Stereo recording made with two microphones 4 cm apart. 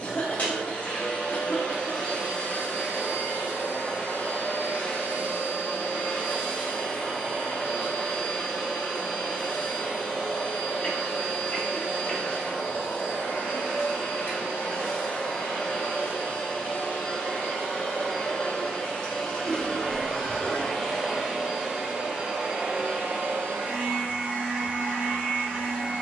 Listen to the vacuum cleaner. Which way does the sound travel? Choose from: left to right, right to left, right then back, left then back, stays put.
left to right.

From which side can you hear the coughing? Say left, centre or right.
left.